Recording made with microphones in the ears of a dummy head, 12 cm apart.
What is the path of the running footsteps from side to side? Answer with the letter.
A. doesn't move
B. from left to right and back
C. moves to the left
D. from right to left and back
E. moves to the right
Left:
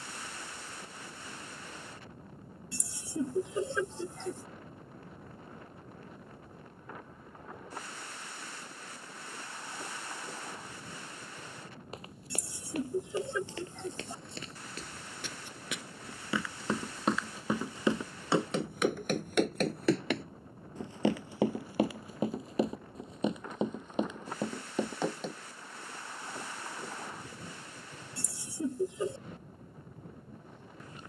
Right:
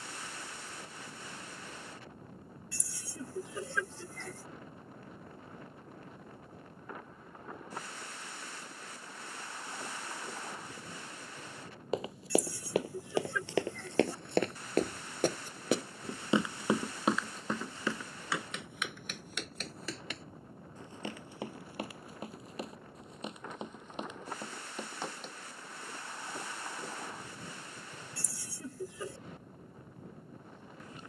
C.